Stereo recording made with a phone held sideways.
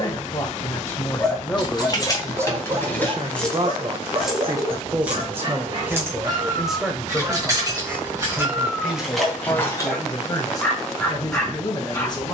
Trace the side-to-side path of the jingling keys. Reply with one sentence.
You can hear the jingling keys go right and come back.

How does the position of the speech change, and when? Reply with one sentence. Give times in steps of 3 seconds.
In this clip you hear the speech in the centre from 0 s, on the right from 3 s, in the centre from 6 s and on the left from 9 s.